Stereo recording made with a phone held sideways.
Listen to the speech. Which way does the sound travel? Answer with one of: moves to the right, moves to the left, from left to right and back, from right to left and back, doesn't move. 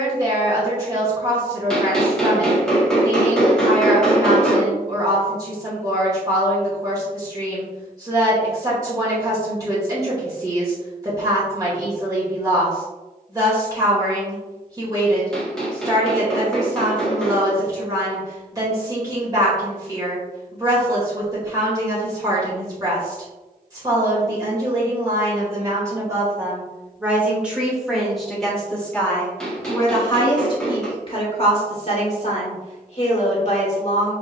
moves to the left.